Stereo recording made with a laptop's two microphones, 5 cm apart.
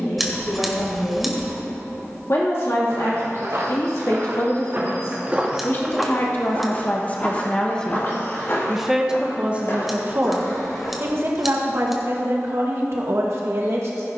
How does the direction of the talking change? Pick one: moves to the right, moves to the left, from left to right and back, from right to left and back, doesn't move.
moves to the right.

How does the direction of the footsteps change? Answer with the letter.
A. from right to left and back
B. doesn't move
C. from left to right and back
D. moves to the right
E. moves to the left
E.